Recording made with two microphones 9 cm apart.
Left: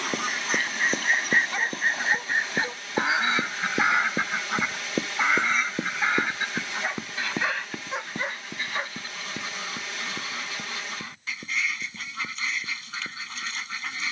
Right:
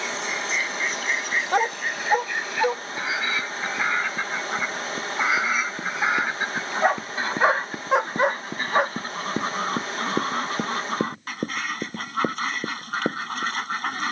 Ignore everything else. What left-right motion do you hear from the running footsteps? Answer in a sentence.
You can hear the running footsteps go from the left side to the right.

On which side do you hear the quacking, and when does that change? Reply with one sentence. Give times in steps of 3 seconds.
In this clip you hear the quacking on the left from 0 s, in the centre from 3 s and on the right from 6 s.